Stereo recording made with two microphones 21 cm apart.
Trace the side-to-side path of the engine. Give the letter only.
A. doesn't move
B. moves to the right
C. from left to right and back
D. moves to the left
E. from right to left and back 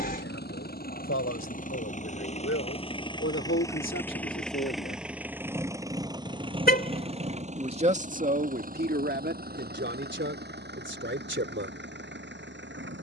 B.